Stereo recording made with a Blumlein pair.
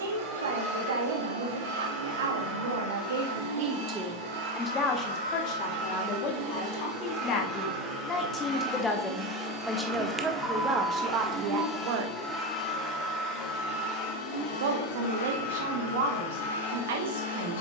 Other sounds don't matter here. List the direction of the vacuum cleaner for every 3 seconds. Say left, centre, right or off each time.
right, right, right, centre, left, left.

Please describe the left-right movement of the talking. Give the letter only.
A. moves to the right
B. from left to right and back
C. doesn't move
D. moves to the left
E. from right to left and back
E.